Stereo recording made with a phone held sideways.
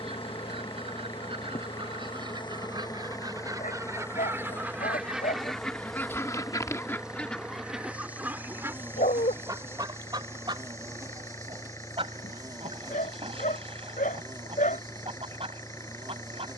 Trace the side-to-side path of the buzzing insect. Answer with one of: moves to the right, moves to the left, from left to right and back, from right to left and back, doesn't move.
moves to the right.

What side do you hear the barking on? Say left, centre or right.
left.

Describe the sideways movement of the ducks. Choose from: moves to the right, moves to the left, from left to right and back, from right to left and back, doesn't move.
from right to left and back.